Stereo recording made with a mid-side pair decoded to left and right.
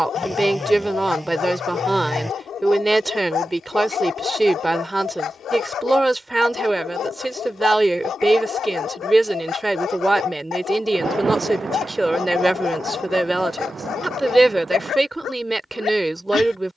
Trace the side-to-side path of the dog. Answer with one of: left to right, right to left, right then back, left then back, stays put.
stays put.